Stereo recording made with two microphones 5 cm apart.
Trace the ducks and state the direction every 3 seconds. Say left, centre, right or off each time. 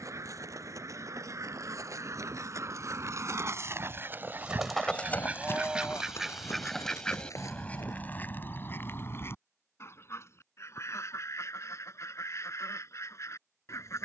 right, right, left, left, left.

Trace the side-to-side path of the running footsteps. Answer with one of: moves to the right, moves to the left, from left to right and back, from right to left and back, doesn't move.
moves to the left.